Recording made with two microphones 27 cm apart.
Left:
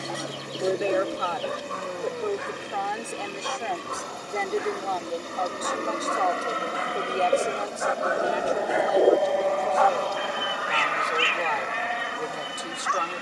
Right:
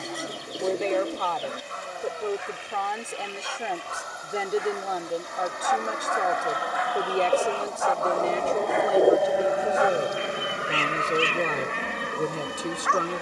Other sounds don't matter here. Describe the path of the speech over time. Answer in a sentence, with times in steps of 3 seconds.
In this clip you hear the speech in the centre from 0 s and on the right from 6 s.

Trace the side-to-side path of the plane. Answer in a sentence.
In this clip you hear the plane travel towards the right.